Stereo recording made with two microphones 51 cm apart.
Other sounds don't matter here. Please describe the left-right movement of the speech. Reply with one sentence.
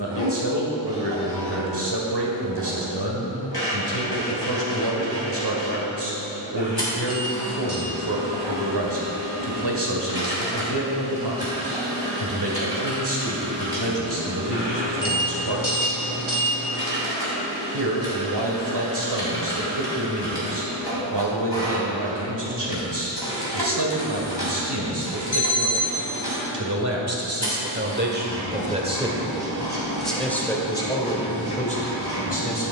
In this clip you hear the speech travel towards the left.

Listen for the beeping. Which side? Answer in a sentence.
You can hear the beeping on the left.